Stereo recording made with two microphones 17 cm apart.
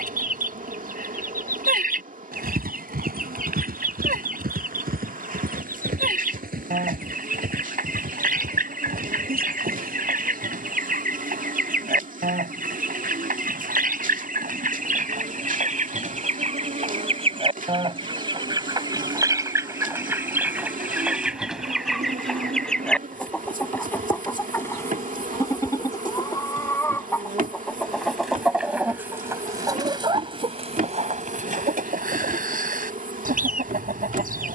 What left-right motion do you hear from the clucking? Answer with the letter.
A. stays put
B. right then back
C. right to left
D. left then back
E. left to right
D.